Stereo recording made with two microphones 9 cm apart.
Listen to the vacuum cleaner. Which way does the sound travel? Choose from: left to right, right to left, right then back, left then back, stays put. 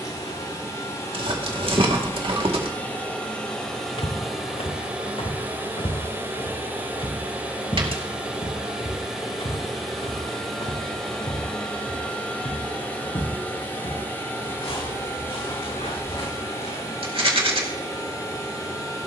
right then back.